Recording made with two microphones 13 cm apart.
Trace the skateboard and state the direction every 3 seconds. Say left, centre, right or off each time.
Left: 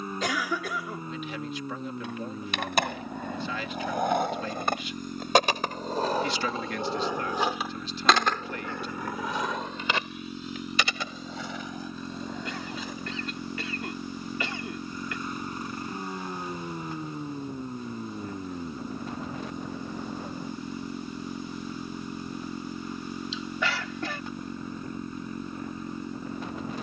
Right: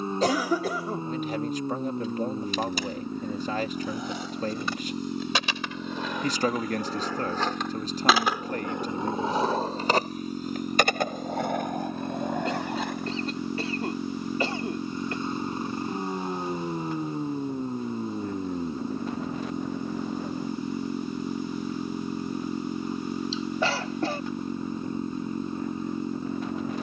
left, left, centre, right, right, off, off, off, off.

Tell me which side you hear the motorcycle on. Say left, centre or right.
right.